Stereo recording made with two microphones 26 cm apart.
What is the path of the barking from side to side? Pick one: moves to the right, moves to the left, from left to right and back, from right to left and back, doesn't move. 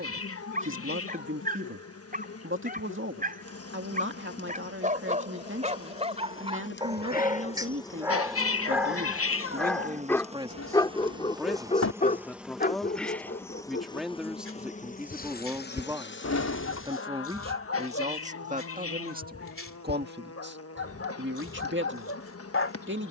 moves to the left.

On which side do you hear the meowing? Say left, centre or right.
left.